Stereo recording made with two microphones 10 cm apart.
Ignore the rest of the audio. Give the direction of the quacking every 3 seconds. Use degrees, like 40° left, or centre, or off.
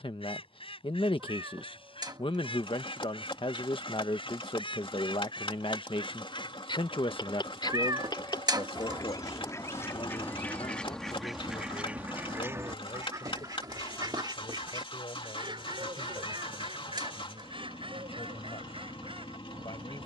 70° left, 70° left, 50° left, 20° left, 40° right, 70° right, 70° right.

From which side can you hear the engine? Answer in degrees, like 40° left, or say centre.
70° left.